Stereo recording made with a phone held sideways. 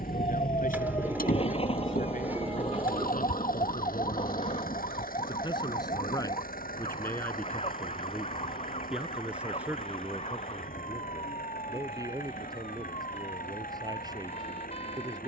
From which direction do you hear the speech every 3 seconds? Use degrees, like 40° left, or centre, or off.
70° left, 40° left, 10° left, 10° right, 30° right.